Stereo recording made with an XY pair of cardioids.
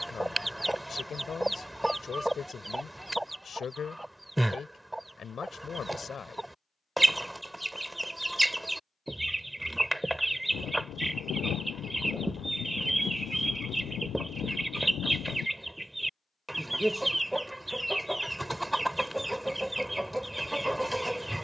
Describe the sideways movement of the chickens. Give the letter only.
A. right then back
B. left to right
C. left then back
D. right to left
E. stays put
E.